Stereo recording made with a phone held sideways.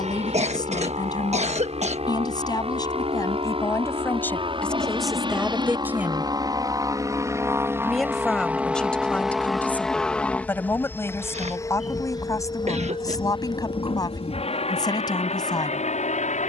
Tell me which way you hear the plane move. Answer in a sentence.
In this clip you hear the plane go from the right side to the left.